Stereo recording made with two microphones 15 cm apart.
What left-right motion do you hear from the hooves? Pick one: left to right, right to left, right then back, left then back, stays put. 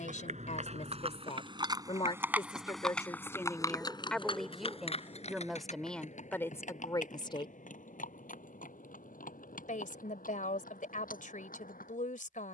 right to left.